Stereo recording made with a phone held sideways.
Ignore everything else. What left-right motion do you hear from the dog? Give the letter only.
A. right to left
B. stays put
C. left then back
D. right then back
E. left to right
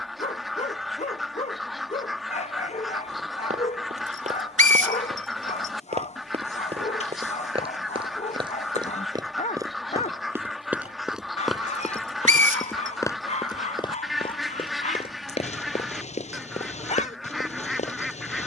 B.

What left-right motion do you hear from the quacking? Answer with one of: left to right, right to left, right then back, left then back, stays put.
stays put.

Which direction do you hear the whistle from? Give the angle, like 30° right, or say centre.
70° right.